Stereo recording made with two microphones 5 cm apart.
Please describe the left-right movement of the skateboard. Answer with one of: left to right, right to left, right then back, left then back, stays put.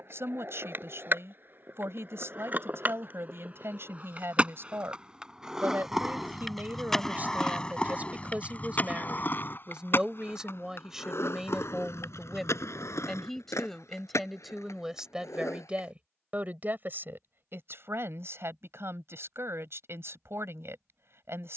right to left.